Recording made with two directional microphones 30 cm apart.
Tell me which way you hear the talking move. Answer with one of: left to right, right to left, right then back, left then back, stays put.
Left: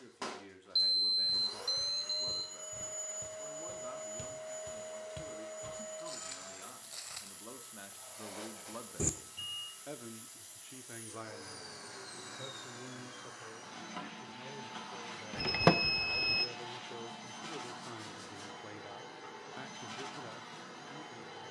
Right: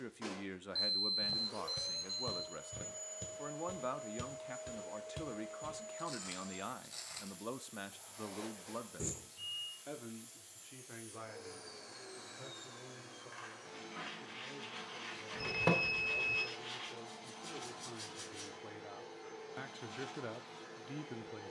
left then back.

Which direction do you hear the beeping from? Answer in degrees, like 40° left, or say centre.
50° left.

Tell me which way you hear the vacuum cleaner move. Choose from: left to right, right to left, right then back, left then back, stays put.
stays put.